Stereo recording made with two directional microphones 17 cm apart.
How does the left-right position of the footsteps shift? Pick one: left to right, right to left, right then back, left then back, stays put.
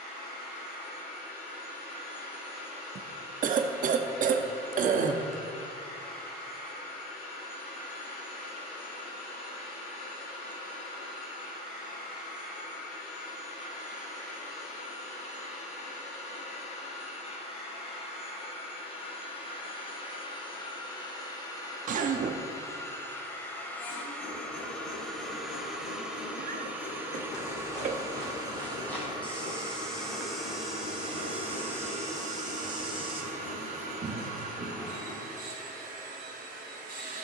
left to right.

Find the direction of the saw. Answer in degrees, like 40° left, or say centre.
60° left.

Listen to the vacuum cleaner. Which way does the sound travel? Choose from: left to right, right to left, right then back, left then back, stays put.
left to right.